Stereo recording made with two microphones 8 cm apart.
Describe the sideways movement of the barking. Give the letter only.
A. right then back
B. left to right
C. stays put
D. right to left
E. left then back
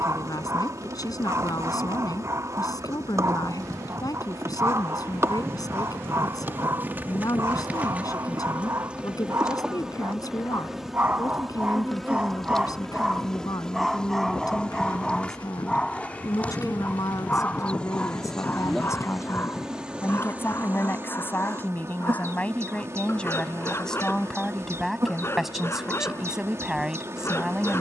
D.